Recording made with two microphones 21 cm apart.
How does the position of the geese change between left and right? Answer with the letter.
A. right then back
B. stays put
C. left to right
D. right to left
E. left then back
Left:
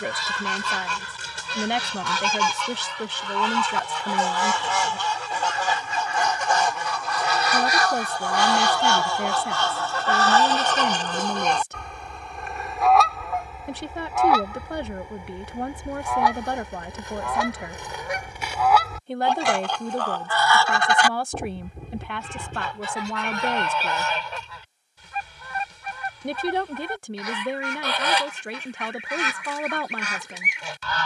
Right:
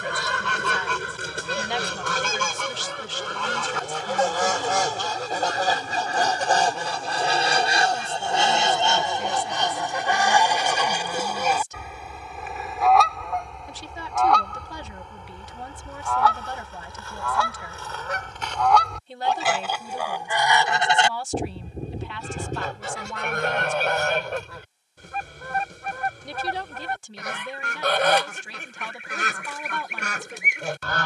E.